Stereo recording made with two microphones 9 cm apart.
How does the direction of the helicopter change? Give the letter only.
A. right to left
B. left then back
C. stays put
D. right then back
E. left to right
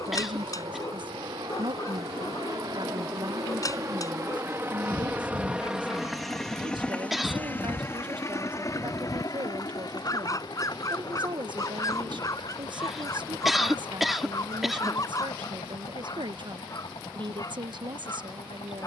A.